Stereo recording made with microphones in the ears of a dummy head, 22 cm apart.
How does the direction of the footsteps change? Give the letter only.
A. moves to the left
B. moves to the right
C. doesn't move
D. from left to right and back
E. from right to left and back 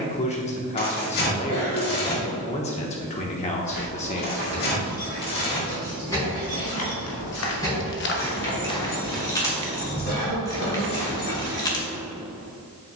B.